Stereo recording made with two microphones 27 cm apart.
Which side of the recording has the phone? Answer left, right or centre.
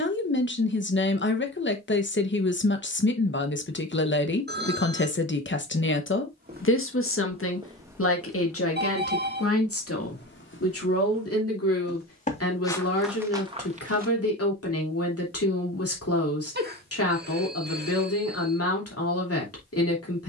right.